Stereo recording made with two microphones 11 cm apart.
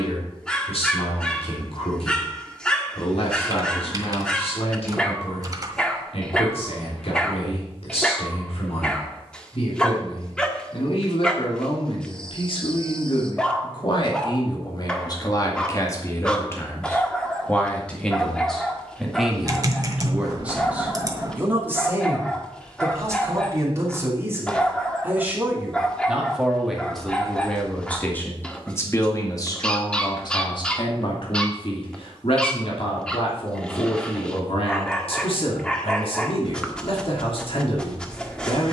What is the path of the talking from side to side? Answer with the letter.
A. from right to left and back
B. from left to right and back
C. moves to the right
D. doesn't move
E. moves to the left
B.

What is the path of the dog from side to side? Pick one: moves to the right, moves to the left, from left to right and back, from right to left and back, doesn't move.
doesn't move.